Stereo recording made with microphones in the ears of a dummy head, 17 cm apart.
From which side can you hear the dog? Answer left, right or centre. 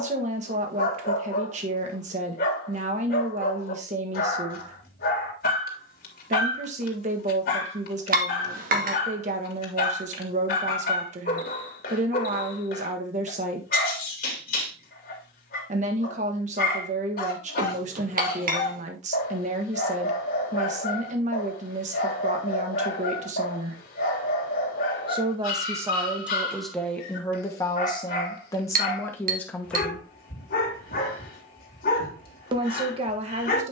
left.